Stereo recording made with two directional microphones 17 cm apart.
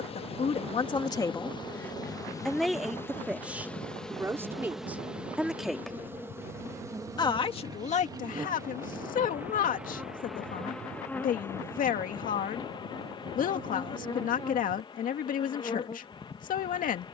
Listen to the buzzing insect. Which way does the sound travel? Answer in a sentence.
In this clip you hear the buzzing insect go right and come back.